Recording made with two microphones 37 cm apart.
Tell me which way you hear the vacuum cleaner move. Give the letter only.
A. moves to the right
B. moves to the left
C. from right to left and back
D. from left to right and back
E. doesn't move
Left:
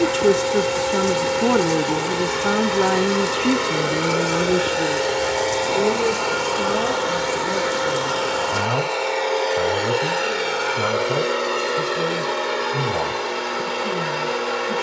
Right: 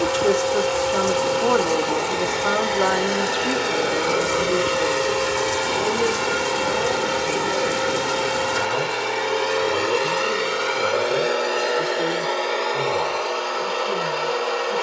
D.